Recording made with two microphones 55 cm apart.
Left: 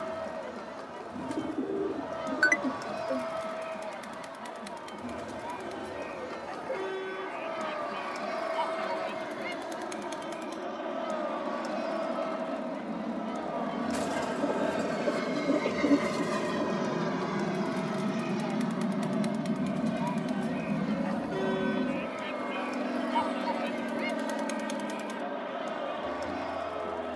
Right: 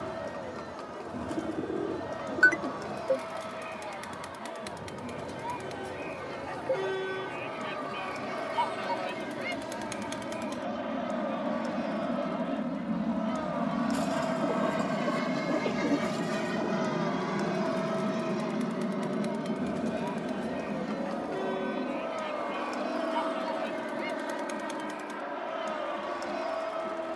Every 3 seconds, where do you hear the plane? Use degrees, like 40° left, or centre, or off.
70° right, 70° right, 60° right, 50° right, 30° right, 10° right, 20° left, 40° left, 50° left.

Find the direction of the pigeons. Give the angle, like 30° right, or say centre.
50° left.